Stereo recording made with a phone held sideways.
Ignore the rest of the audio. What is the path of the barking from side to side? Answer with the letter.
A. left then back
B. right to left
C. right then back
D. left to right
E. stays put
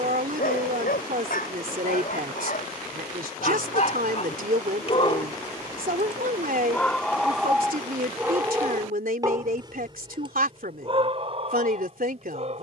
D.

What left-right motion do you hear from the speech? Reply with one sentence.
You can hear the speech stay in one place.